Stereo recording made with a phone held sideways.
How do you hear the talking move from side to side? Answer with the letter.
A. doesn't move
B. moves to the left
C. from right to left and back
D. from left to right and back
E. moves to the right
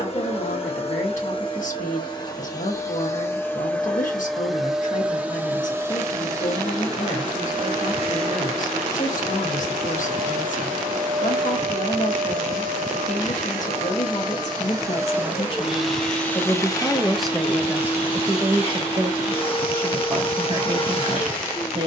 E.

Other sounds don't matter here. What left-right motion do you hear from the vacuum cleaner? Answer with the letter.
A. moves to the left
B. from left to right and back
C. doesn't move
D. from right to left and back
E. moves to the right
B.